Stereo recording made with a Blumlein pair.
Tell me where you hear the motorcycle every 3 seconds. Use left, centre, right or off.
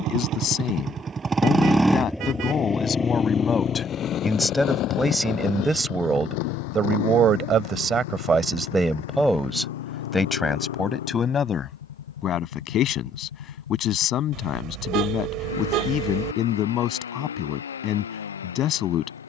centre, left, left, left, left, left, left.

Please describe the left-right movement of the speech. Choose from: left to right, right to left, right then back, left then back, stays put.
right then back.